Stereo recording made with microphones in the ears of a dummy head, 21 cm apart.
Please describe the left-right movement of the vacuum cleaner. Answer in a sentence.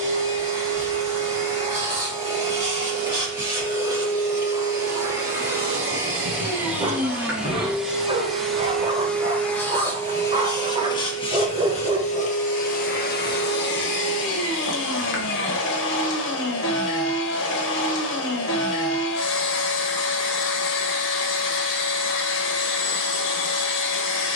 In this clip you hear the vacuum cleaner go from the right side to the left.